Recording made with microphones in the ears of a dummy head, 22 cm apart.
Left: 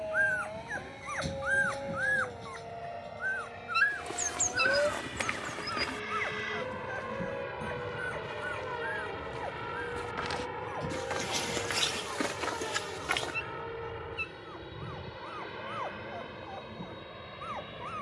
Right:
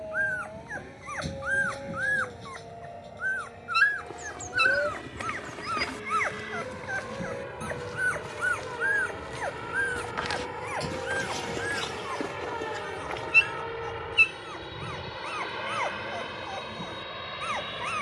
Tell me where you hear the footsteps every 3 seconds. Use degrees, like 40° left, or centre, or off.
off, 40° left, 40° right, centre, 60° left, off.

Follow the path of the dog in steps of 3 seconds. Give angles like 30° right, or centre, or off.
centre, 20° right, 40° right, 50° right, 60° right, 60° right.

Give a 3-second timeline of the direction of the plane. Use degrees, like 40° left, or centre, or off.
50° left, 40° left, 20° left, centre, 20° right, 40° right.